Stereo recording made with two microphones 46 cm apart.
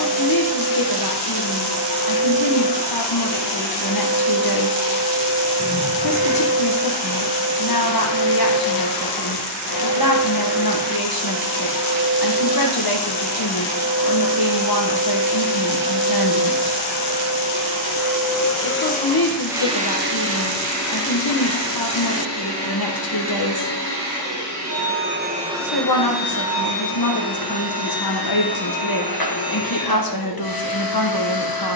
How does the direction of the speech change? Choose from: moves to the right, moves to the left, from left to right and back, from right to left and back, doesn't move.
doesn't move.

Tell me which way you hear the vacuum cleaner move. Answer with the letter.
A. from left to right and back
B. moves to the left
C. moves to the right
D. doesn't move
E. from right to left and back
A.